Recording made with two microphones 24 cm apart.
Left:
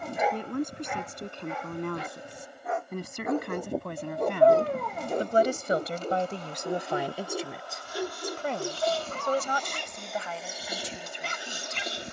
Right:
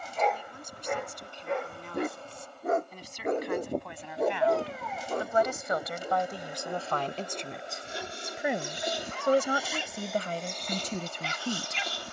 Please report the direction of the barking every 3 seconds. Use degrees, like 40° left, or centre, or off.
40° right, centre, 50° left, 50° left.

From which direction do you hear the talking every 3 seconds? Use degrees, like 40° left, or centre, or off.
60° left, 50° left, 10° left, 40° right.